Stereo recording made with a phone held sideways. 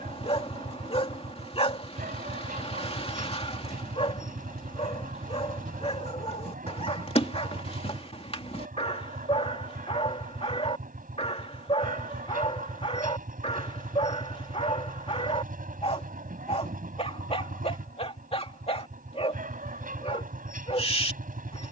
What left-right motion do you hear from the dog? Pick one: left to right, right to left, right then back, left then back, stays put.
stays put.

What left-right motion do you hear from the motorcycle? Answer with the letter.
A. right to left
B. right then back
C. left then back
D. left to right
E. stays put
E.